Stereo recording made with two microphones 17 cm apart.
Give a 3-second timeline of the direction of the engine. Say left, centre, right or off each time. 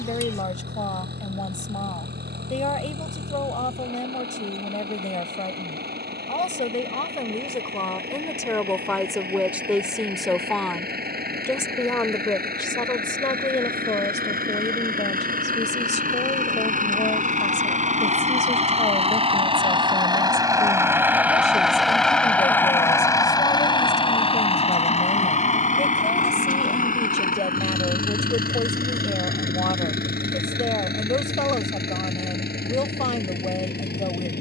right, right, right, right, right, right, right, centre, left, left, left, left.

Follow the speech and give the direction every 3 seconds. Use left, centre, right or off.
left, left, left, centre, left, left, left, left, left, left, left, left.